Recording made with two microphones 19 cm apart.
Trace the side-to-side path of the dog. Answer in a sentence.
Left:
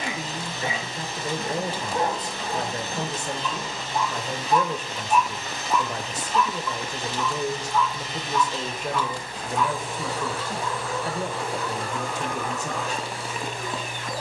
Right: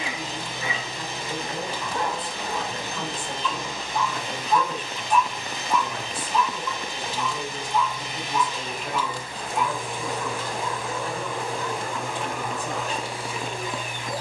You can hear the dog move from left to right.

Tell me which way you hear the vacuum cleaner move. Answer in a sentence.
In this clip you hear the vacuum cleaner stay in one place.